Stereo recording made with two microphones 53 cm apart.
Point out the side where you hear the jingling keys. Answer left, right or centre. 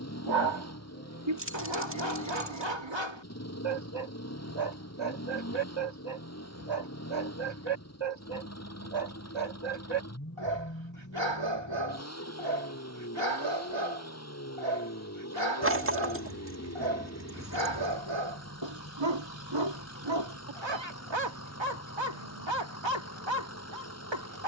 right.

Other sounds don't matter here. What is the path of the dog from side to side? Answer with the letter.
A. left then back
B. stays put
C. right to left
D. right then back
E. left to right
B.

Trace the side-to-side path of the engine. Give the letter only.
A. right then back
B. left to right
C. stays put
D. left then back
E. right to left
C.